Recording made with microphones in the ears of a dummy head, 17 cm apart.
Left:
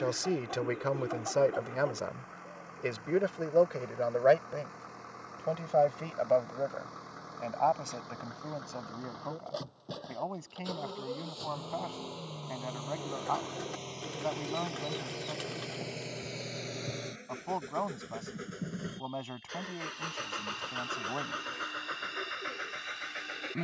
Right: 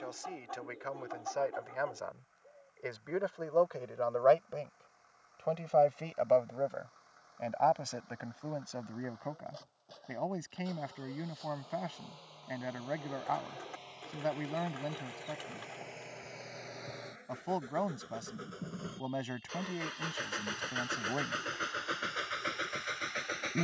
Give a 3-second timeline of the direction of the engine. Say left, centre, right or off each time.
left, left, left, left, left, left, centre, right.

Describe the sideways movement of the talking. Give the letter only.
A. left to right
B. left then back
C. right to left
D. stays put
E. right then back
A.